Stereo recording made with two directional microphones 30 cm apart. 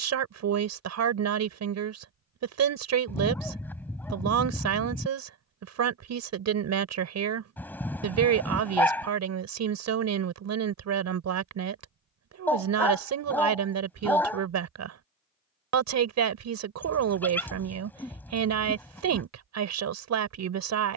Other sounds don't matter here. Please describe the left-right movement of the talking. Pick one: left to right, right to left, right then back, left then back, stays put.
stays put.